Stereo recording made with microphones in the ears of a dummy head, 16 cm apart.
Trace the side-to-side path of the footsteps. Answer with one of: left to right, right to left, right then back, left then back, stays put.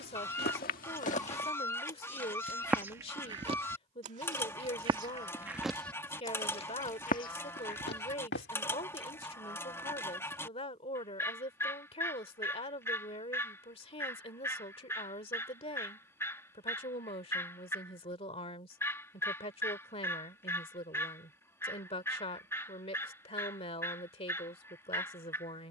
right then back.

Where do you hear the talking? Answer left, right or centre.
left.